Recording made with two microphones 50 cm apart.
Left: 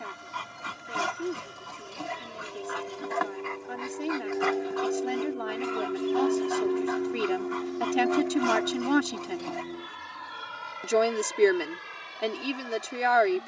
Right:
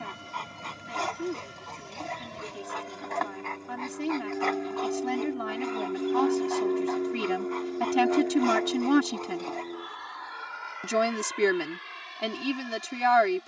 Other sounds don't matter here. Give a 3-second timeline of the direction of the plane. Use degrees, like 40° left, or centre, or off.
50° right, 30° right, 10° left, 50° left, 60° left.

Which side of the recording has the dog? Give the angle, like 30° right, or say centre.
30° left.